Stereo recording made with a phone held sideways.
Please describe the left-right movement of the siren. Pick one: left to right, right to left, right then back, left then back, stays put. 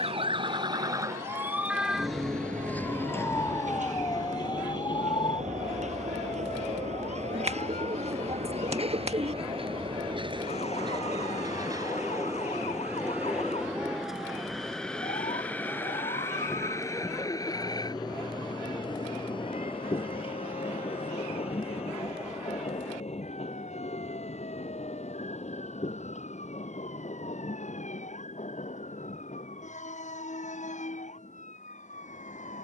right to left.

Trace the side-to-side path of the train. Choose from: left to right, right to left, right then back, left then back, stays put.
right to left.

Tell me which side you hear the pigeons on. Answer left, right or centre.
right.